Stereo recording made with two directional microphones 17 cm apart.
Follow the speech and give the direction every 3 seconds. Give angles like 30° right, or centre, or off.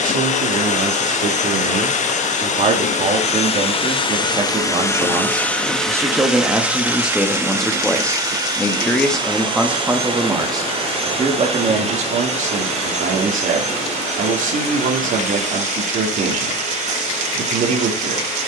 50° right, 30° right, centre, 20° right, 50° right, 50° right.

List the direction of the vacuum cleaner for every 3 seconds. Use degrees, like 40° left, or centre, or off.
50° left, 20° left, 10° right, 30° right, 40° right, 40° right.